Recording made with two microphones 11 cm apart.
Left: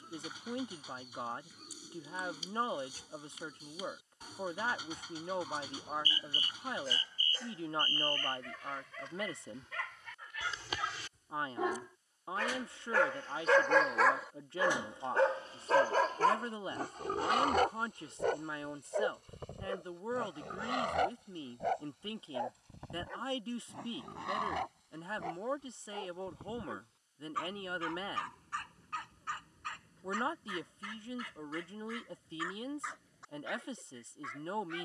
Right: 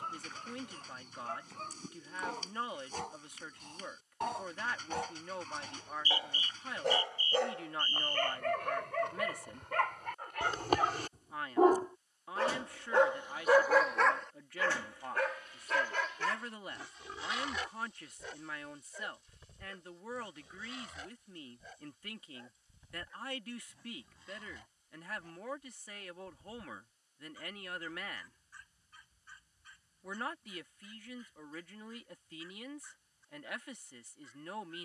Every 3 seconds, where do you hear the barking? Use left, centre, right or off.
right, right, right, right, centre, left, left, left, left, left, left, left.